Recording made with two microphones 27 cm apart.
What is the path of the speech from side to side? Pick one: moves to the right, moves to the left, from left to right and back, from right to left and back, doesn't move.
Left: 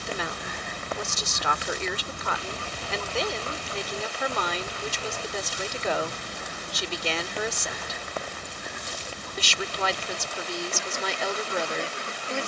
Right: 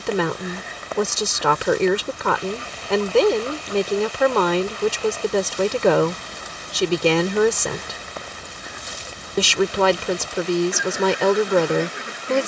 doesn't move.